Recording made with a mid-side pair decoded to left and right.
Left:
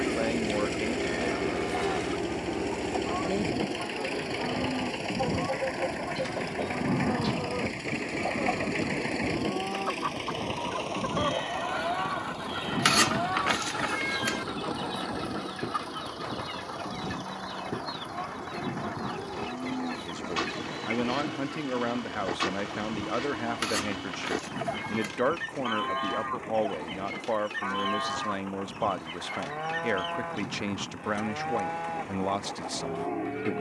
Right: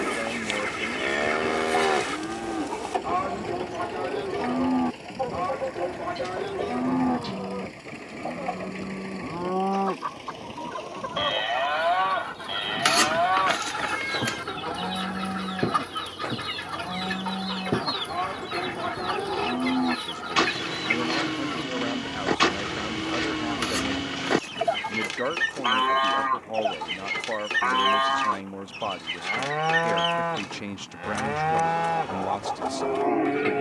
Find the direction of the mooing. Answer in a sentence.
You can hear the mooing on the right.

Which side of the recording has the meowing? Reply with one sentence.
You can hear the meowing in the centre.